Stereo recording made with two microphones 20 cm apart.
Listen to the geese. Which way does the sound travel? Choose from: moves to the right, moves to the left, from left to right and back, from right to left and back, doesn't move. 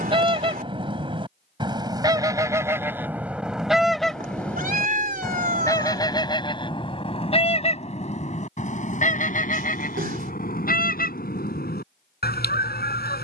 moves to the left.